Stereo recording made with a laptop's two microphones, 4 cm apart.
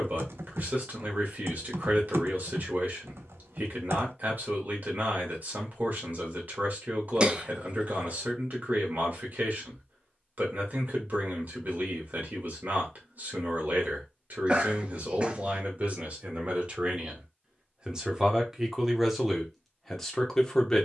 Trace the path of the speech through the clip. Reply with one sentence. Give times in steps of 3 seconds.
In this clip you hear the speech on the right from 0 s and in the centre from 18 s.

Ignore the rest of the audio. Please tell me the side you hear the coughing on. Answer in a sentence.
In this clip you hear the coughing on the right.